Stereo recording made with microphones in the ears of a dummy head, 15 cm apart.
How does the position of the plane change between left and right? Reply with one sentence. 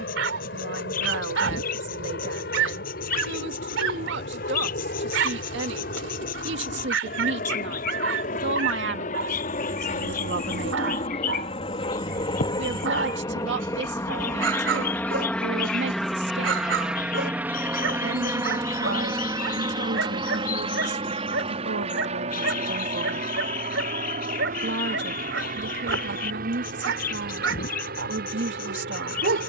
You can hear the plane travel towards the right.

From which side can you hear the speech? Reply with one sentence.
In this clip you hear the speech on the right.